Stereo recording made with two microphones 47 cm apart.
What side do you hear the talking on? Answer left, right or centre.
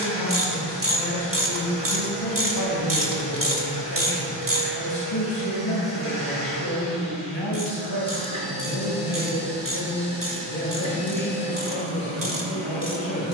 left.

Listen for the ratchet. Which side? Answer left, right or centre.
right.